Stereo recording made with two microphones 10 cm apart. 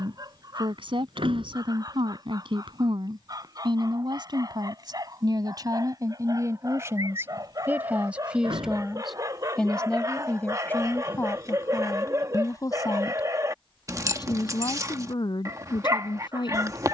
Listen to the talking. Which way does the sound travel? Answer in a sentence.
You can hear the talking move to the left.